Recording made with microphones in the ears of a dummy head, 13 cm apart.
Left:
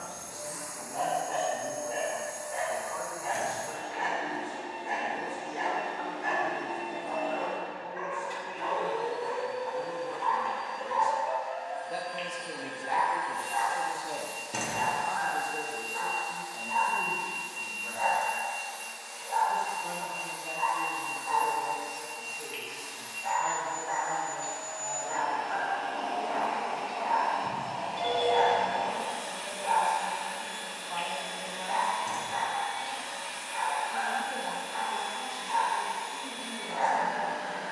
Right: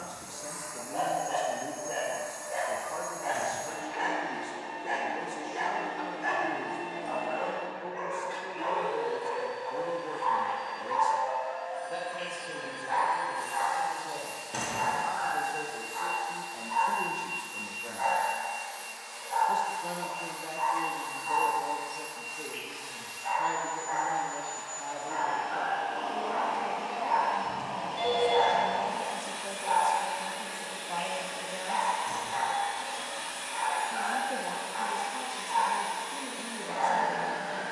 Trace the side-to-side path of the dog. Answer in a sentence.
In this clip you hear the dog move from right to left.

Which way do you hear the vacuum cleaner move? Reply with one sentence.
You can hear the vacuum cleaner move from left to right.